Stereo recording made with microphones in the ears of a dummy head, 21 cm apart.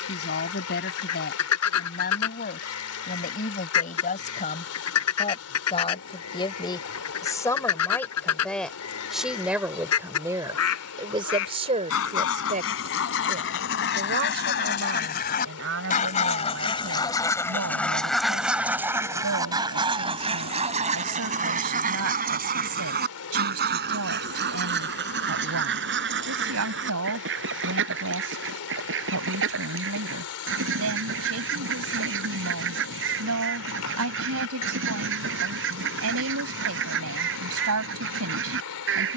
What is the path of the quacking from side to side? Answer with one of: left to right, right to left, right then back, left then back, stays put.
left to right.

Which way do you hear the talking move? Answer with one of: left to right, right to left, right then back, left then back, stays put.
left to right.